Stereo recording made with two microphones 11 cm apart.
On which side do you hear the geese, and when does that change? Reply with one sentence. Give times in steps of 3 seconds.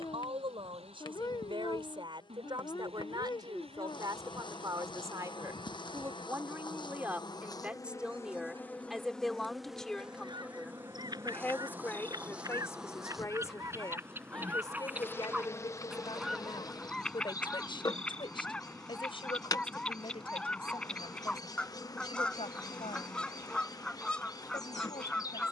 In this clip you hear the geese on the right from 0 s and in the centre from 15 s.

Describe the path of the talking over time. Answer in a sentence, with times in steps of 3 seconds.
In this clip you hear the talking on the right from 0 s, in the centre from 6 s and on the left from 12 s.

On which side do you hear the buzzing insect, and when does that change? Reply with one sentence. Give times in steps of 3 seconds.
You can hear the buzzing insect on the left from 0 s, in the centre from 9 s and on the left from 15 s.